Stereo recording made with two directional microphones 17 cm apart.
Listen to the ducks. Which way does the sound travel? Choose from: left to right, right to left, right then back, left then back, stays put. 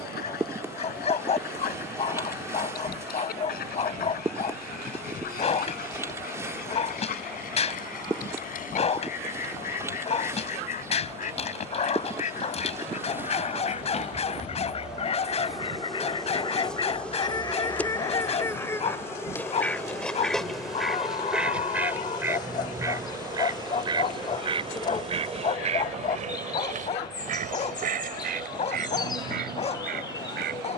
left to right.